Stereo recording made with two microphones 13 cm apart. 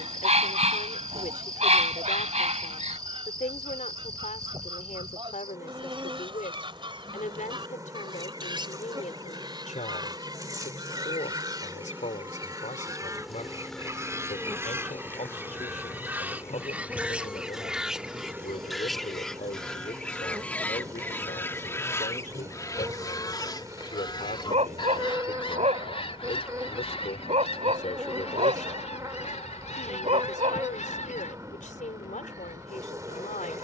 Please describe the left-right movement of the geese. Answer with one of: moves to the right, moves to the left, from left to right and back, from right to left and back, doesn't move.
moves to the left.